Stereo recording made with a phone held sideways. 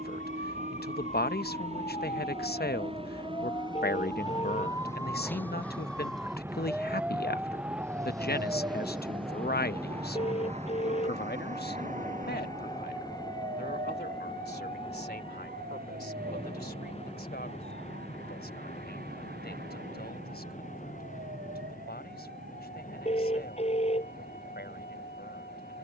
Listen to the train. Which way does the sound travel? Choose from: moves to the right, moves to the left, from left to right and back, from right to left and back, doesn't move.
moves to the left.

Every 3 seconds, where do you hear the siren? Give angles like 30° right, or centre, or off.
40° left, 20° left, 10° right, 40° right, 60° right, 70° right, 70° right, 70° right, 80° right.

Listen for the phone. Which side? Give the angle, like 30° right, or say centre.
40° left.